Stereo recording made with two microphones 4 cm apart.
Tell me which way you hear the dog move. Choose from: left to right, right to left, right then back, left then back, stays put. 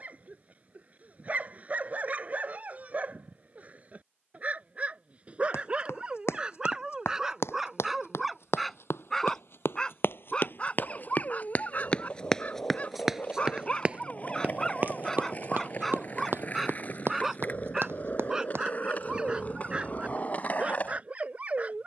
left then back.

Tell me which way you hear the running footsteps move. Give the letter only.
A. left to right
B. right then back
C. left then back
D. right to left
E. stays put
A.